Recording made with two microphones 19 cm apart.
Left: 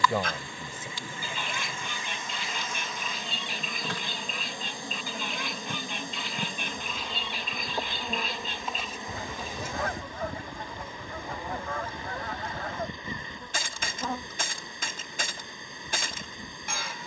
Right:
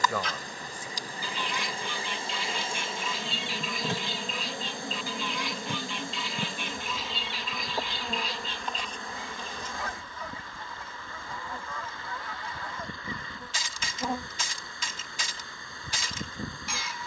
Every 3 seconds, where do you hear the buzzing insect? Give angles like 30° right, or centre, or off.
40° right, 20° right, centre, 10° left, 10° right, 40° right.